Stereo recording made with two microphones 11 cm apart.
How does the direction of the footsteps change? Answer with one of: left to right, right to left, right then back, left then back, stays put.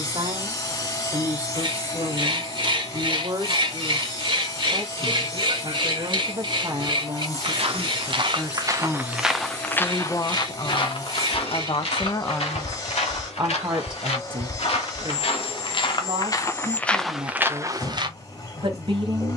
left then back.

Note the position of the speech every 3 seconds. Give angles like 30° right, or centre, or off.
50° right, 50° right, 30° right, 30° left, 20° right, 50° right, 50° right.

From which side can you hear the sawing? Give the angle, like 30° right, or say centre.
40° right.